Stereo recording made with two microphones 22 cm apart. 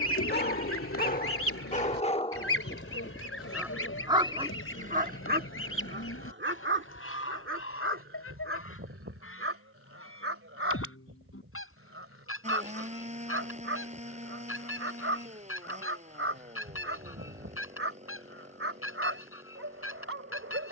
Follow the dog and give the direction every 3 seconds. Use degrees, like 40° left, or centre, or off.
40° left, 30° right, 70° right, 80° right, 80° right, 80° right, 80° right.